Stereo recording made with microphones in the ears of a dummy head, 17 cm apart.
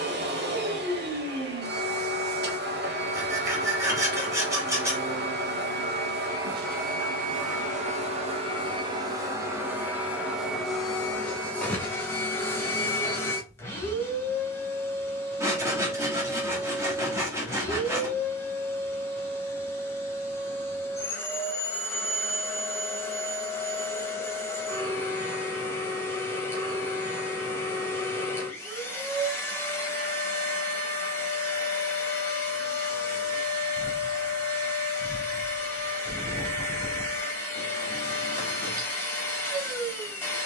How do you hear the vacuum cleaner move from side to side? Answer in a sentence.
You can hear the vacuum cleaner move from right to left.